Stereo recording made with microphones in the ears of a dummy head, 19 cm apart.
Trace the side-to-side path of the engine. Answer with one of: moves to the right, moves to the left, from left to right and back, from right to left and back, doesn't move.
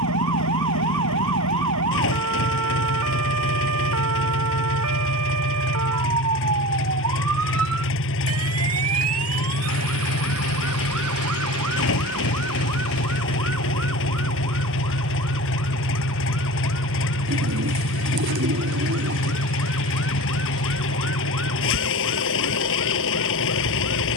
doesn't move.